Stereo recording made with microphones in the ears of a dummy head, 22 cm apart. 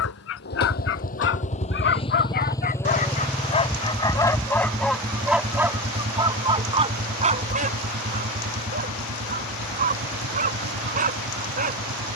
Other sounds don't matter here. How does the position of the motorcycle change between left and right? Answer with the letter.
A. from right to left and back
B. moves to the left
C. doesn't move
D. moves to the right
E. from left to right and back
D.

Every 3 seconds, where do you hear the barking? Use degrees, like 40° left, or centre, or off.
50° left, 10° left, 30° right, 30° right.